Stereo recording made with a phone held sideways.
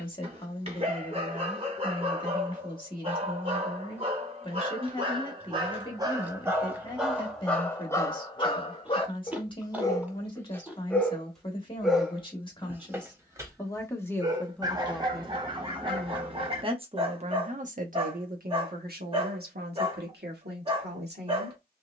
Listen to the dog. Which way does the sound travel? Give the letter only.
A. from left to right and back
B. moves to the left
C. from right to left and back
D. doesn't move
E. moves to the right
C.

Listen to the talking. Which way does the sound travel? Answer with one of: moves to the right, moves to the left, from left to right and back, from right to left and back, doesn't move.
moves to the right.